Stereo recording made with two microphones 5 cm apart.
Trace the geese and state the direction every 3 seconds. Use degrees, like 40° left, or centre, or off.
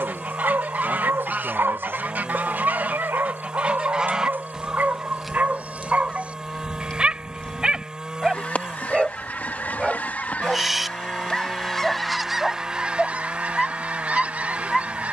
40° right, 10° right, 20° left, 30° left, 20° right.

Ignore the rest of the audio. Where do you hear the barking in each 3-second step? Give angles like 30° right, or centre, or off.
60° right, 40° right, 20° right, 10° right, centre.